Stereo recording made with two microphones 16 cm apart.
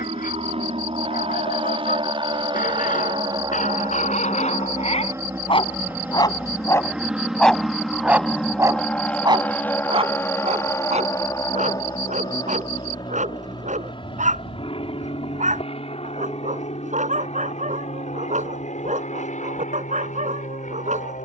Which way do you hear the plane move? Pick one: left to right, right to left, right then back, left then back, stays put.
right to left.